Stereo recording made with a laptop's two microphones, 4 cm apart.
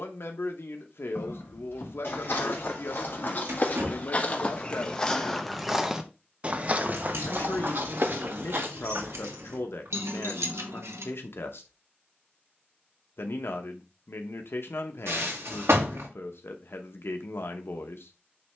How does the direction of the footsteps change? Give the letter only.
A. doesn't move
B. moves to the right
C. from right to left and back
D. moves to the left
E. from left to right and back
B.